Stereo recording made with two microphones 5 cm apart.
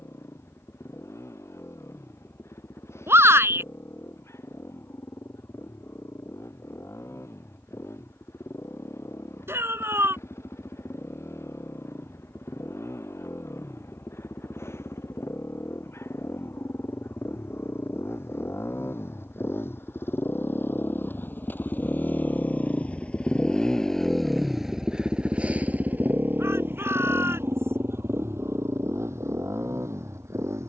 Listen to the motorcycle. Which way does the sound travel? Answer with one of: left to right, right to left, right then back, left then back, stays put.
left to right.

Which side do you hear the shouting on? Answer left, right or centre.
right.